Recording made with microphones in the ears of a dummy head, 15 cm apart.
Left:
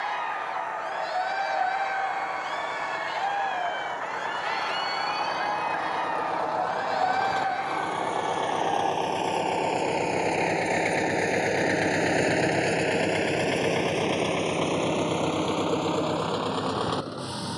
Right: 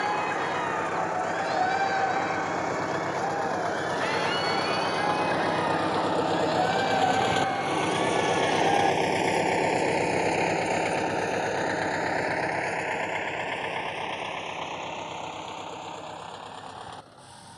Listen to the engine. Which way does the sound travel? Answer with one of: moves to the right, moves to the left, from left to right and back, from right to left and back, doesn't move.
moves to the left.